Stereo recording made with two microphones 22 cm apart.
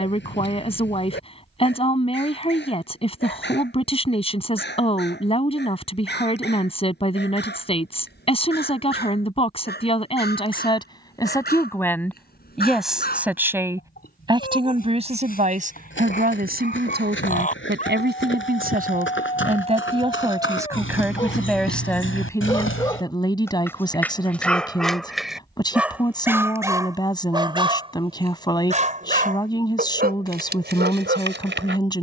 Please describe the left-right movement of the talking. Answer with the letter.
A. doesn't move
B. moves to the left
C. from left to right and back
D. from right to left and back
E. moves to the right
C.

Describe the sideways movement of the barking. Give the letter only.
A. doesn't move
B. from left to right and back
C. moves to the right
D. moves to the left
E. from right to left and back
C.